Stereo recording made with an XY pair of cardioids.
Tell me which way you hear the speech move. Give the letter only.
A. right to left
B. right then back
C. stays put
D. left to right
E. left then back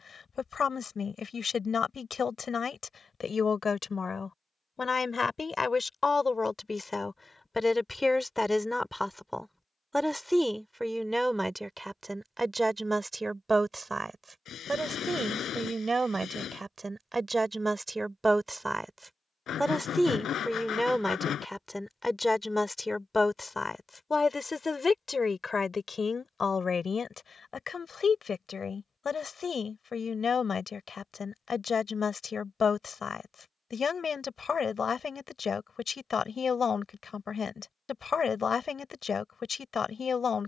B.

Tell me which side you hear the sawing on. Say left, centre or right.
left.